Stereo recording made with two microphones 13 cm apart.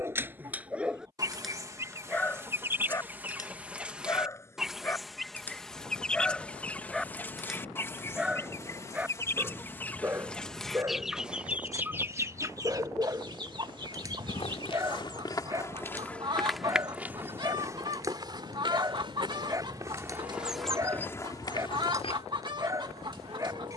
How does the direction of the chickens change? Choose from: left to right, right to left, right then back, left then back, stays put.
left then back.